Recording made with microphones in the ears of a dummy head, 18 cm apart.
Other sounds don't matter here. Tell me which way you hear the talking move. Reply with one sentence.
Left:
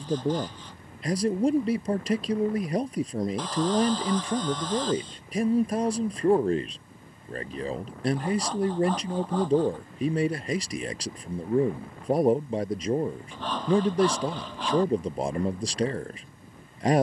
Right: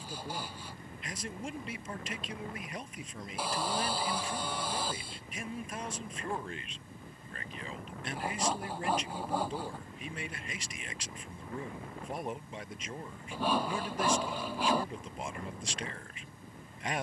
In this clip you hear the talking stay in one place.